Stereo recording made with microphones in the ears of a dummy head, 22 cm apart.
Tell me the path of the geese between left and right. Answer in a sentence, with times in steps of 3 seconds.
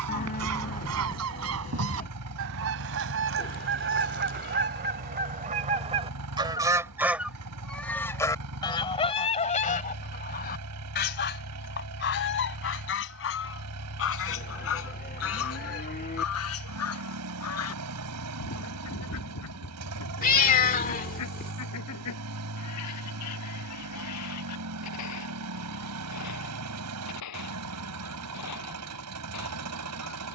You can hear the geese on the right from 0 s, in the centre from 6 s and on the left from 9 s.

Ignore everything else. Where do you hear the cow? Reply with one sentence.
In this clip you hear the cow on the left.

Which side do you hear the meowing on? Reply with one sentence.
In this clip you hear the meowing on the left.